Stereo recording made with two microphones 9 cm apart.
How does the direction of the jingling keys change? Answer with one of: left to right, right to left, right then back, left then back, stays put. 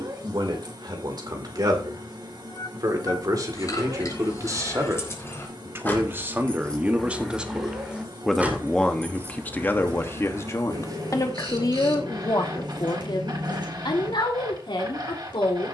left to right.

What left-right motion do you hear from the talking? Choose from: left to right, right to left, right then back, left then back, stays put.
right to left.